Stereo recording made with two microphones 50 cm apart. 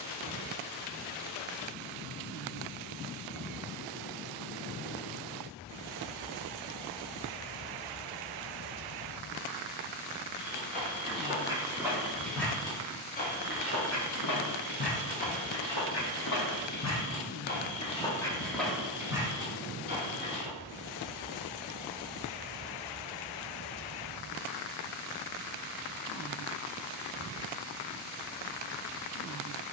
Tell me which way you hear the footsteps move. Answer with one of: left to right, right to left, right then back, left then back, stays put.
left then back.